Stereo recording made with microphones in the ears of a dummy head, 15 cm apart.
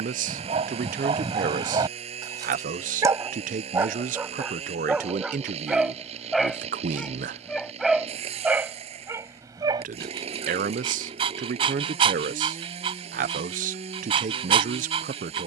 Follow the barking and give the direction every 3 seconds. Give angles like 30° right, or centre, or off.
30° right, 10° right, centre, 30° right, 30° right.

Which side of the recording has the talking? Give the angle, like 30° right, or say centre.
50° right.